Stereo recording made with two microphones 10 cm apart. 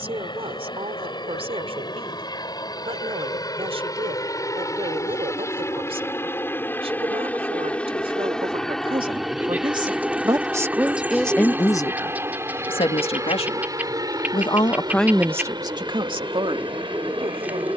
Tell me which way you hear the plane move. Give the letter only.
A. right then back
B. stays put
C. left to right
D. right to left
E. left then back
C.